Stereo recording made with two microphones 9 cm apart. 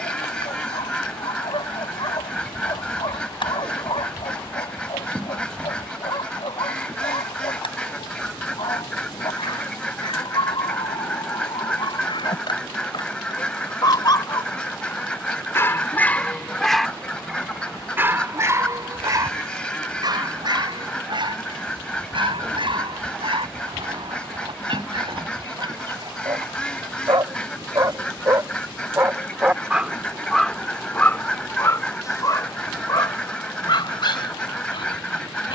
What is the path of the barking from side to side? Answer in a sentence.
In this clip you hear the barking move from left to right and back again.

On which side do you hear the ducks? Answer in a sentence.
In this clip you hear the ducks in the centre.